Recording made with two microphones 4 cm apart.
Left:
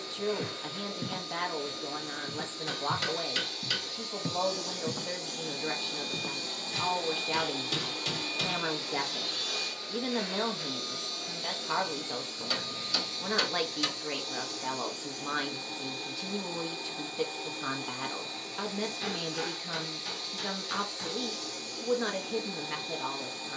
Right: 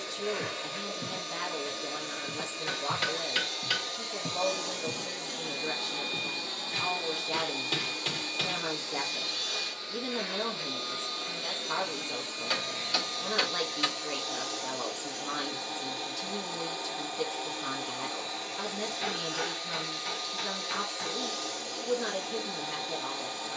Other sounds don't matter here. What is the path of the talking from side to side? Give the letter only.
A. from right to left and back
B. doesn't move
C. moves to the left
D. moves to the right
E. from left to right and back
B.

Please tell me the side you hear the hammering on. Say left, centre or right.
right.